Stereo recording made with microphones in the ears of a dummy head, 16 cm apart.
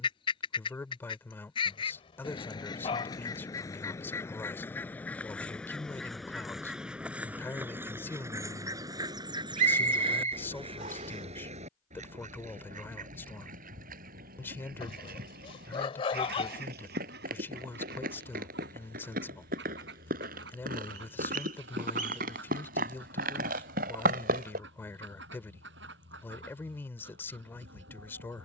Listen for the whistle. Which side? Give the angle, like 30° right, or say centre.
40° right.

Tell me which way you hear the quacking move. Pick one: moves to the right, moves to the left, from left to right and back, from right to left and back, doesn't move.
moves to the right.